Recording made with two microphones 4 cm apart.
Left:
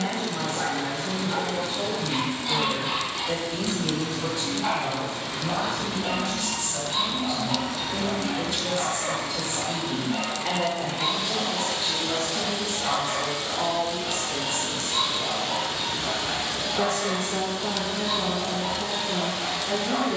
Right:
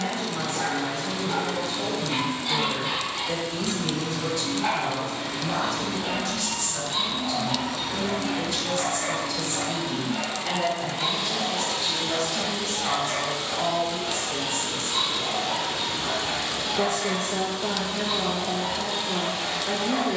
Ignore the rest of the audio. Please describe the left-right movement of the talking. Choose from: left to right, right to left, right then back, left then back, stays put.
left to right.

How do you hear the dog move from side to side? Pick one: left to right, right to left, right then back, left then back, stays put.
stays put.